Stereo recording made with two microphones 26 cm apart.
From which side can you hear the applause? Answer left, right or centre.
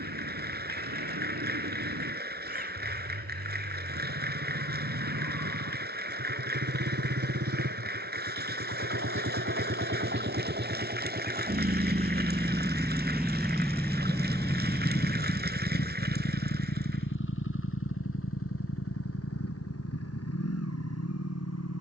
right.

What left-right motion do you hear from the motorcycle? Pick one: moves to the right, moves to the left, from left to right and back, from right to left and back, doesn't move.
moves to the left.